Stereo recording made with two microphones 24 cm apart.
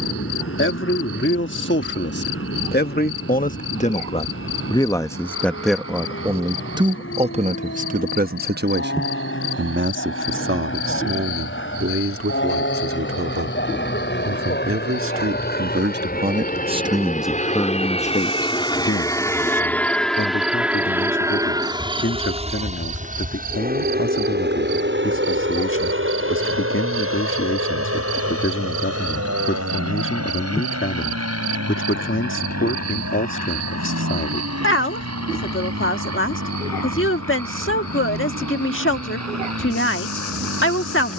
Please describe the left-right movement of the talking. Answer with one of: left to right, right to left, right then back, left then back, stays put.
right then back.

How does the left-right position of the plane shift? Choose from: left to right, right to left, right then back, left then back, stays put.
left to right.